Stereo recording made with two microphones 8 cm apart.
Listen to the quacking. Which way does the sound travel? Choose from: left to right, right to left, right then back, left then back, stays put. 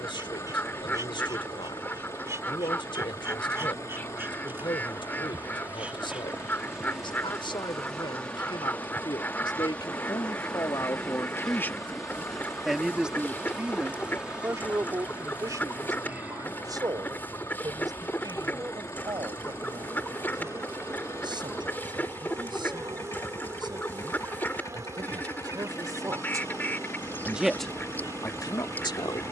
stays put.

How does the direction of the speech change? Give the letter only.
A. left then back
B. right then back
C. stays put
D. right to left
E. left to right
B.